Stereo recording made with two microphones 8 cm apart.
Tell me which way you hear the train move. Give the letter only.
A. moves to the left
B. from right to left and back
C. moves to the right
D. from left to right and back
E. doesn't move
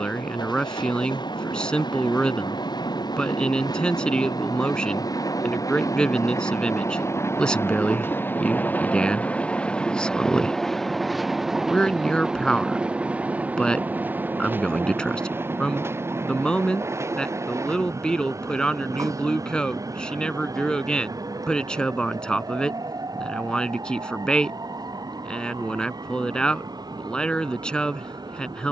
C.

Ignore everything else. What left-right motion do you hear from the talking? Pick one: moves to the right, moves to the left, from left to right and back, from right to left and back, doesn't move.
doesn't move.